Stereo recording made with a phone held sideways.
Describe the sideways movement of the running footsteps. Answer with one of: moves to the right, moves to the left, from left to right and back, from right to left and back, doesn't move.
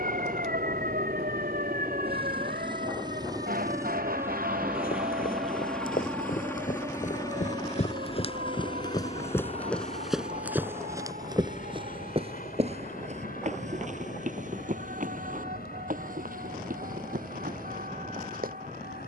moves to the right.